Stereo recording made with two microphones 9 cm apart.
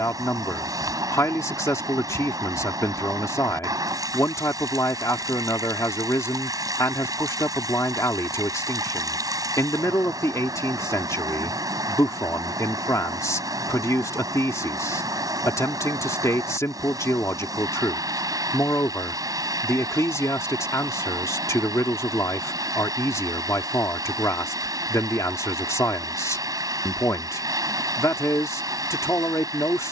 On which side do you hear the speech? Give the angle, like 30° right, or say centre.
40° left.